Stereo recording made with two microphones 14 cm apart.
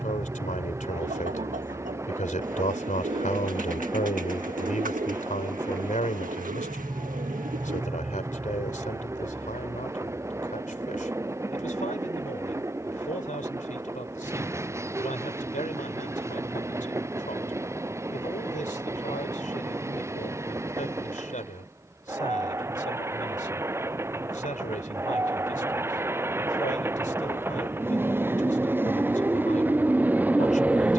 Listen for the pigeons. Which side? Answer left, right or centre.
right.